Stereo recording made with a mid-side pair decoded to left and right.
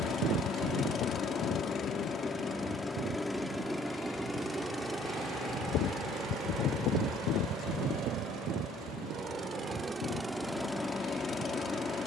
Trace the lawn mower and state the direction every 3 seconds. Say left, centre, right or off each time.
left, centre, right, centre.